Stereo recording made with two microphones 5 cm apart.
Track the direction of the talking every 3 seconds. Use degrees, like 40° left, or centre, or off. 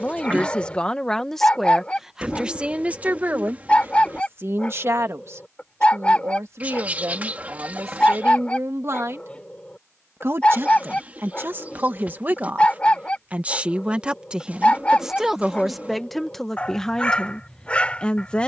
centre, 50° right, 60° right, 40° right, 20° right, 10° left.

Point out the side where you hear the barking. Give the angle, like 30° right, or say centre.
20° left.